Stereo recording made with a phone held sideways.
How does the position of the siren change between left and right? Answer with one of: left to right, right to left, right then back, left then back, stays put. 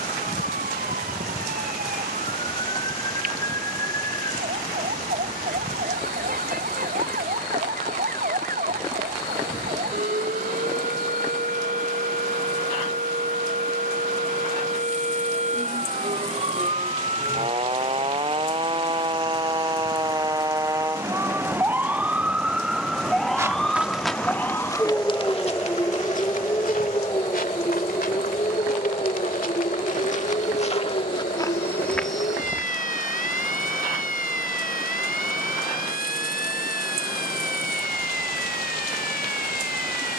right to left.